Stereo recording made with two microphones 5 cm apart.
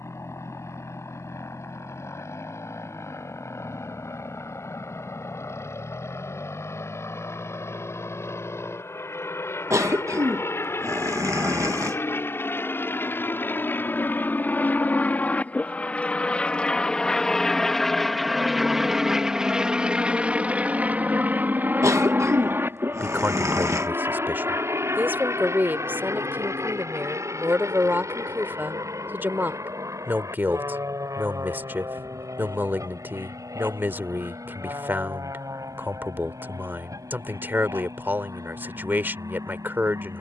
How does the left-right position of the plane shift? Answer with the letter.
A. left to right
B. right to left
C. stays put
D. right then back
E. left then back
A.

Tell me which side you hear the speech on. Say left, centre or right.
right.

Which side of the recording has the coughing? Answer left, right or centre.
right.